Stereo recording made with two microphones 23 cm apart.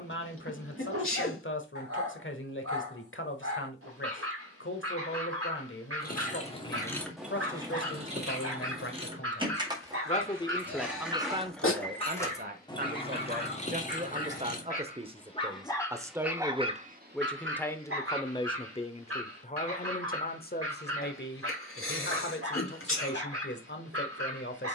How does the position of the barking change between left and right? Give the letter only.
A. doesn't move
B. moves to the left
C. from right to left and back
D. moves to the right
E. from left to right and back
C.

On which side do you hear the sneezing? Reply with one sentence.
In this clip you hear the sneezing on the left.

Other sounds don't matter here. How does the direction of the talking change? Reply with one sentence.
You can hear the talking go right and come back.